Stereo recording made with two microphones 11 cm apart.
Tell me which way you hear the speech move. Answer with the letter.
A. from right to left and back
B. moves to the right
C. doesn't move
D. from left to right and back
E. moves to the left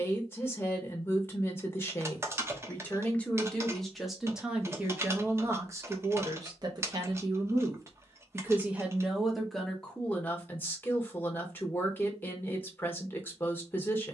D.